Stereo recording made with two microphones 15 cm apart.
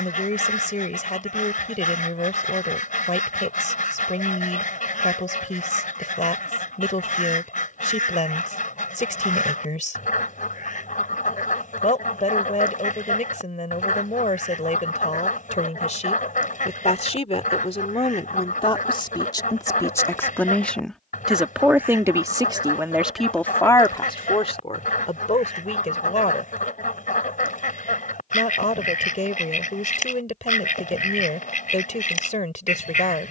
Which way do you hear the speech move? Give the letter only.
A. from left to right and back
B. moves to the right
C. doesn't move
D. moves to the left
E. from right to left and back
A.